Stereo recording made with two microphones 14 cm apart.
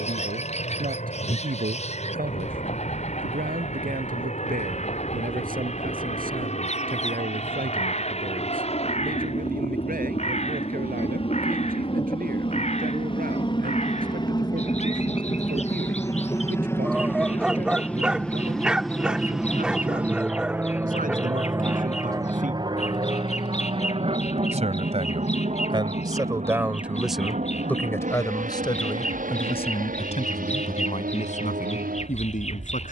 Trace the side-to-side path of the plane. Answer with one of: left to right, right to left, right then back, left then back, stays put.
left to right.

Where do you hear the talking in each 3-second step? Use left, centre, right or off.
right, right, right, right, right, right, right, right, right, left, left.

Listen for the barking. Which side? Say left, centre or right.
centre.